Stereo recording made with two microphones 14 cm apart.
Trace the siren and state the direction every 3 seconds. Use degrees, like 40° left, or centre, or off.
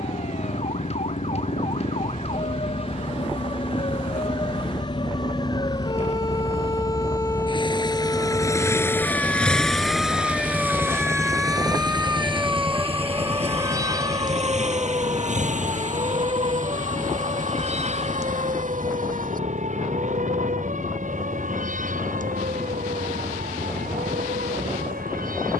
50° left, 40° left, 20° left, centre, 20° right, 40° right, 50° right, 60° right, 70° right.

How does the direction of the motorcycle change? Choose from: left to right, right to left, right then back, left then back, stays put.
left to right.